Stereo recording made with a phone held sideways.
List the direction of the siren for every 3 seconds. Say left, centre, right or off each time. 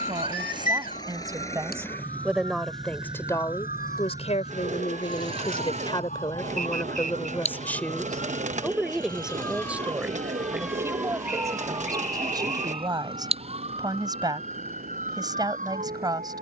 left, left, left, centre, right, right.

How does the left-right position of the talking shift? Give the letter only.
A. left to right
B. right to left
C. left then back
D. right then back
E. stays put
C.